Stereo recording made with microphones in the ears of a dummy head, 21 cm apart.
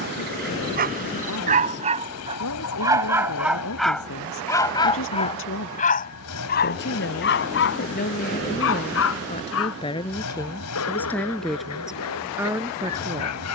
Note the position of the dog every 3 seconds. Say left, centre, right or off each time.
right, centre, left, left, left.